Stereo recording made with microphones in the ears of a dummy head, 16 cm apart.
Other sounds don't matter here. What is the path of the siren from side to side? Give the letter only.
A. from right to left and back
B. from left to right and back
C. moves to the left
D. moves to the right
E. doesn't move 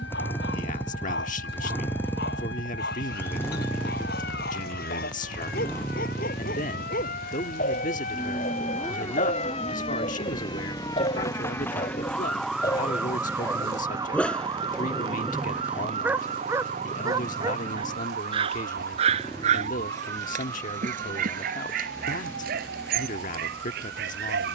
D.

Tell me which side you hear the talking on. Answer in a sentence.
In this clip you hear the talking on the left.